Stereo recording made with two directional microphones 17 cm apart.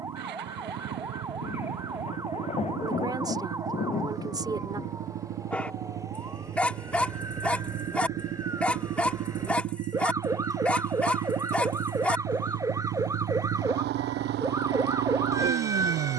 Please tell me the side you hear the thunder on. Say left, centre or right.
left.